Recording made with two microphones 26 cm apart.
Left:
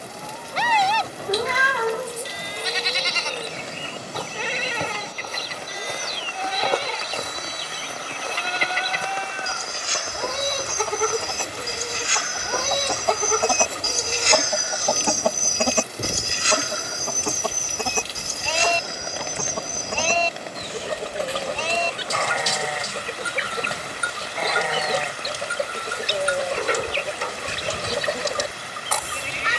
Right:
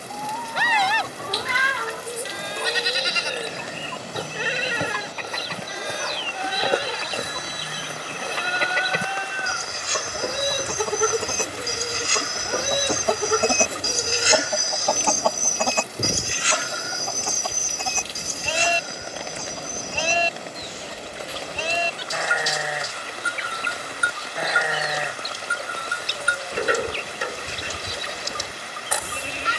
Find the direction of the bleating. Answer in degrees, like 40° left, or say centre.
10° right.